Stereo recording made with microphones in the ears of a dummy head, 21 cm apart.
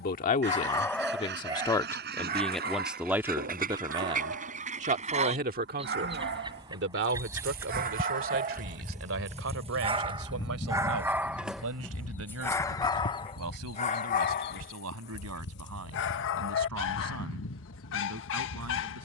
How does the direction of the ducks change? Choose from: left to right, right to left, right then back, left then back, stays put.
right to left.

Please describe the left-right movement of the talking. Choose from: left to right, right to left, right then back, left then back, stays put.
left to right.